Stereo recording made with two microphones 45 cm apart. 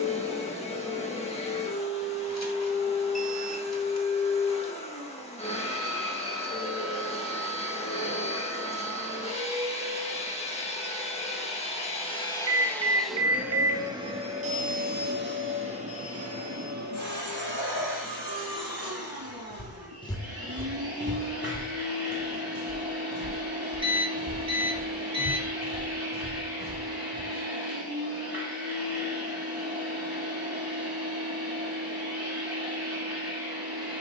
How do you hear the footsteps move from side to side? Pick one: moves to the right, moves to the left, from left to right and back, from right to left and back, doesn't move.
moves to the right.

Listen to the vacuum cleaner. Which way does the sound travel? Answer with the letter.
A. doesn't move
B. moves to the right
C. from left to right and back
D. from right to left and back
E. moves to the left
B.